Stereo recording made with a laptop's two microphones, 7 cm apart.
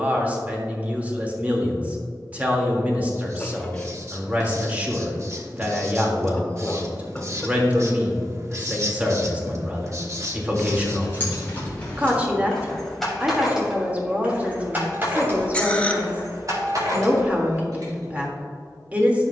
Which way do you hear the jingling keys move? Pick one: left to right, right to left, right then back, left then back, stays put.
left to right.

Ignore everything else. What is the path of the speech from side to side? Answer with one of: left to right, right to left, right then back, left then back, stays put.
stays put.